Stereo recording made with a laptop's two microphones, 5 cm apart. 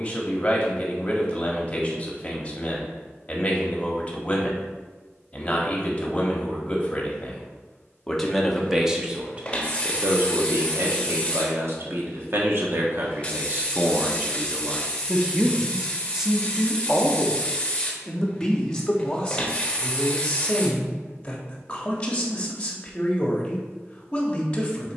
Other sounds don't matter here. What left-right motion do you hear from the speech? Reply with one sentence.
You can hear the speech go right and come back.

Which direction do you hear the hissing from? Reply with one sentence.
In this clip you hear the hissing on the left.